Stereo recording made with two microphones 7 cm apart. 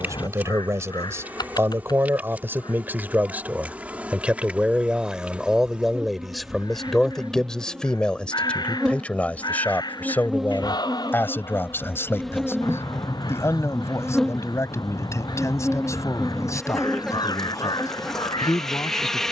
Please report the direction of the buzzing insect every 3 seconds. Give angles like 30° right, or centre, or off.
20° right, 20° right, 10° right, centre, 10° left, 10° left, 10° left.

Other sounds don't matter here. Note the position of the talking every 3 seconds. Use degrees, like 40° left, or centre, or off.
40° right, 10° right, 10° left, 30° left, 40° left, 50° left, 50° left.